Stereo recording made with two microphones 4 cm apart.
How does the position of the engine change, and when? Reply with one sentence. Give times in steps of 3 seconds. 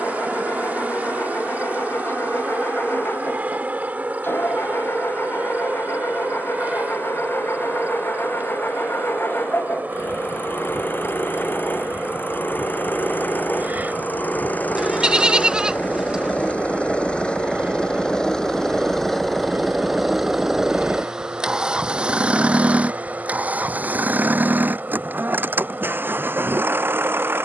You can hear the engine on the left from 0 s, in the centre from 18 s and on the right from 21 s.